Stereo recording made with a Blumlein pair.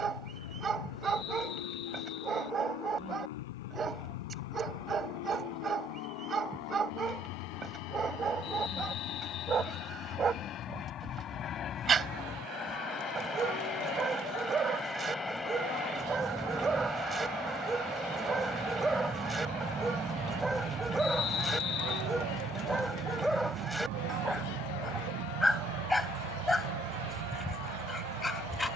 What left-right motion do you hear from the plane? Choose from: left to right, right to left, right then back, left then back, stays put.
left to right.